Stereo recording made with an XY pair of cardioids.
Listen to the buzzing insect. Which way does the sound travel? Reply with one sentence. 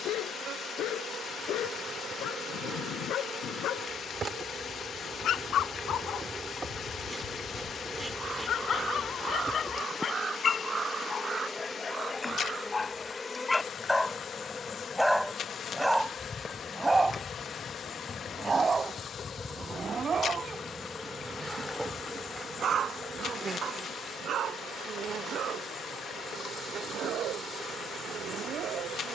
You can hear the buzzing insect move from right to left and back again.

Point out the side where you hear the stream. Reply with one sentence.
You can hear the stream on the left.